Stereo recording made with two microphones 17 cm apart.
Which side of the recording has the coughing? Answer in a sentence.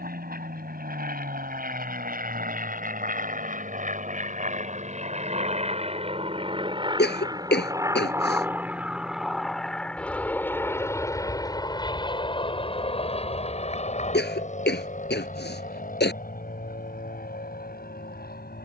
You can hear the coughing on the left.